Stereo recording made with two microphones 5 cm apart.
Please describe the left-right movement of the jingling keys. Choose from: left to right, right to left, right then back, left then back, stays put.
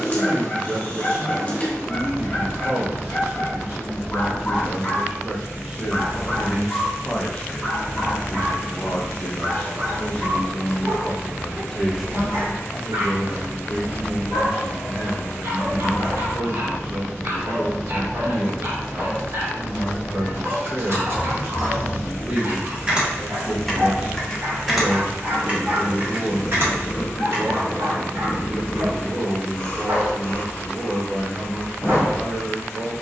left then back.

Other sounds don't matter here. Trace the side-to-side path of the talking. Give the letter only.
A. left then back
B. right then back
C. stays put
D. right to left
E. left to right
A.